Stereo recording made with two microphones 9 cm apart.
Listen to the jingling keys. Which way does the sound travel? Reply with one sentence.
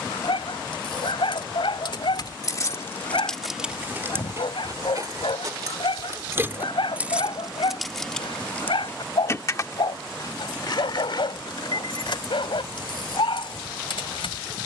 In this clip you hear the jingling keys go right and come back.